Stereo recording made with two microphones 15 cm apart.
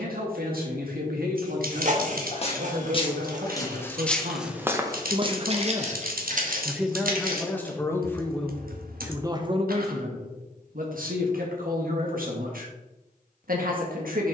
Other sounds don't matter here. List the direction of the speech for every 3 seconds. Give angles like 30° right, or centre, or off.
80° right, 50° right, 10° left, 60° right, 70° right.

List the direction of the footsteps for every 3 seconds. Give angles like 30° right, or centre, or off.
40° left, 10° right, 70° right, off, off.